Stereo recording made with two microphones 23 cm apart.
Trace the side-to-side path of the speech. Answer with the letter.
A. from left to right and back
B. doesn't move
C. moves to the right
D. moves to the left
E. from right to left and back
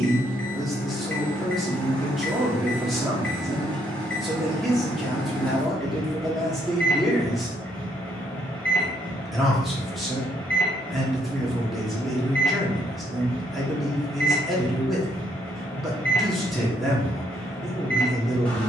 B.